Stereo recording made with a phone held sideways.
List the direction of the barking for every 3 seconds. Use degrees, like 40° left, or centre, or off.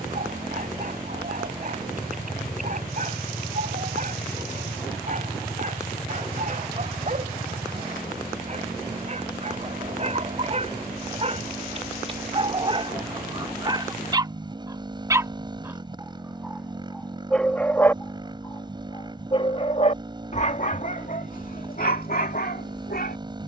60° right, 50° right, 50° right, 40° right, 30° right, centre, 40° left, 60° left.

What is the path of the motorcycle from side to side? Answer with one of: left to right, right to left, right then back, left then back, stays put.
stays put.